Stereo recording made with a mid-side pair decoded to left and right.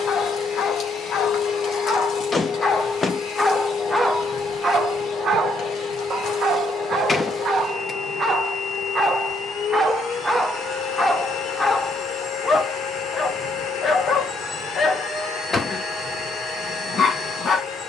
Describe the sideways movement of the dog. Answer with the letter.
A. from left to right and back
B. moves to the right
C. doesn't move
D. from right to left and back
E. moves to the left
A.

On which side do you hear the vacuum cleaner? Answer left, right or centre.
left.